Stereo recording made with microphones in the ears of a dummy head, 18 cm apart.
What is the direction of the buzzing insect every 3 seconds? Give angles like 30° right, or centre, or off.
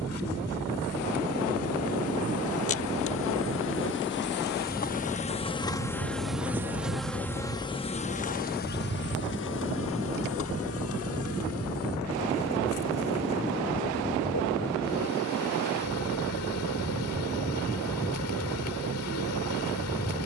80° left, 40° left, 20° left, 70° left, 80° left, 80° left, 80° left.